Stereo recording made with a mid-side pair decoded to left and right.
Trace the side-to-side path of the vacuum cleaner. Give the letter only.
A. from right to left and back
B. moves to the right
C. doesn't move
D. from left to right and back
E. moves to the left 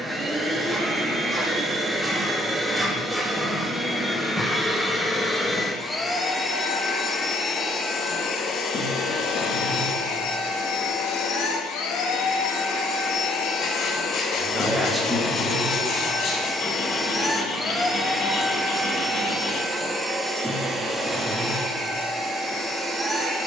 A.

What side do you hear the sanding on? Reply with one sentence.
In this clip you hear the sanding on the left.